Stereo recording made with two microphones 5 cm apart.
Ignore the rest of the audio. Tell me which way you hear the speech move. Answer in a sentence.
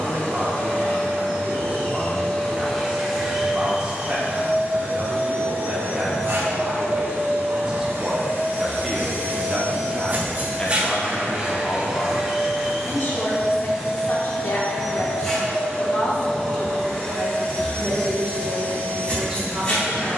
You can hear the speech go left and come back.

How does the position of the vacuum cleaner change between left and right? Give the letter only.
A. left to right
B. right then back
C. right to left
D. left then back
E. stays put
B.